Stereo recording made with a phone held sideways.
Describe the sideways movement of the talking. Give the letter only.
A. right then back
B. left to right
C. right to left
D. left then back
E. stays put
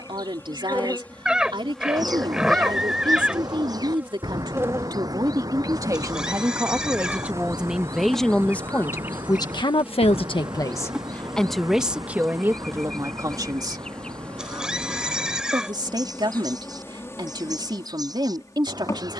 D.